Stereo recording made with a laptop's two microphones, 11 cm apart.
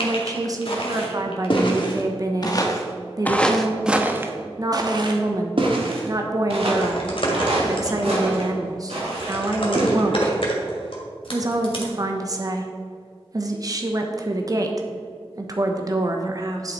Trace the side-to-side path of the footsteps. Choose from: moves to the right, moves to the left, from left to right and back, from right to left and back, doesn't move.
moves to the right.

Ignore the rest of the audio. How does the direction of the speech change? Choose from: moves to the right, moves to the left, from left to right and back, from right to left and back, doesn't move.
doesn't move.